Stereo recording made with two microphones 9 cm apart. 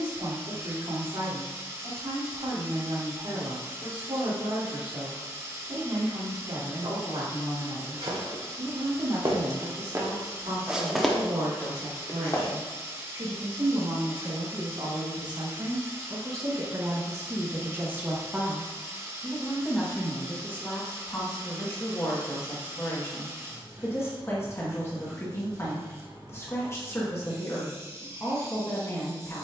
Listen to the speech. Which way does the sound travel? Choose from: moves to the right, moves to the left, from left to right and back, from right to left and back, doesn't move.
moves to the left.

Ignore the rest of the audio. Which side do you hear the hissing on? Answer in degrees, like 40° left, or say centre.
30° right.